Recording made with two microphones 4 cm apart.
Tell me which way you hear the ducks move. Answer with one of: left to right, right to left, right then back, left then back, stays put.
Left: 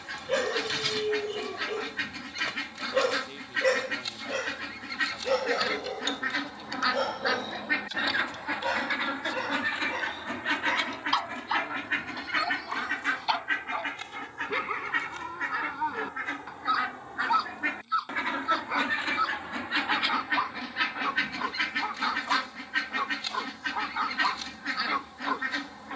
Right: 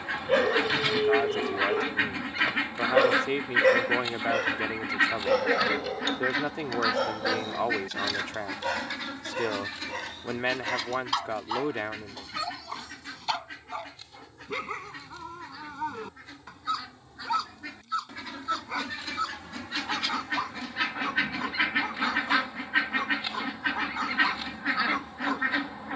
left then back.